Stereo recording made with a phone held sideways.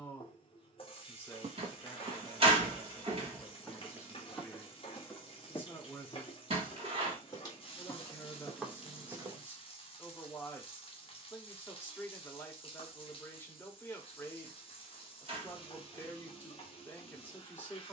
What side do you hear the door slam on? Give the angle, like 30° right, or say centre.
40° right.